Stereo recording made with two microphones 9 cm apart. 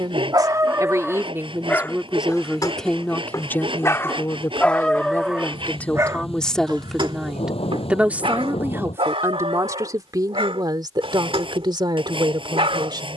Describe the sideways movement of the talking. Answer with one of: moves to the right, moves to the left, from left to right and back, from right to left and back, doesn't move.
from right to left and back.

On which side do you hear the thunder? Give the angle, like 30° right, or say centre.
80° left.